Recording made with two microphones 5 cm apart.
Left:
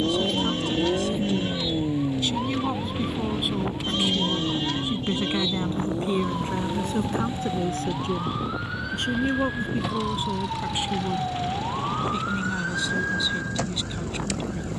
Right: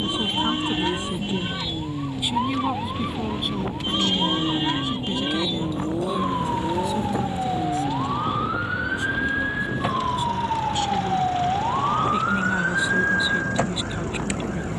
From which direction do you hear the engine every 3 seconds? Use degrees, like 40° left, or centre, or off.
30° left, 10° right, 30° right, 40° right, 50° right.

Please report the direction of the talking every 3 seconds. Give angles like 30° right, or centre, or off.
10° right, 20° left, 50° left, 30° left, 20° right.